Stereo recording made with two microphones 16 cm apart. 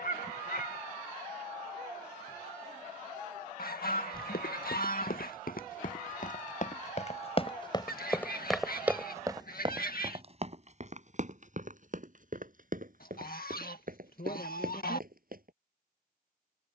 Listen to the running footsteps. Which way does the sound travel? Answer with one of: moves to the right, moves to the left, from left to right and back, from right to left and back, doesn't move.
moves to the right.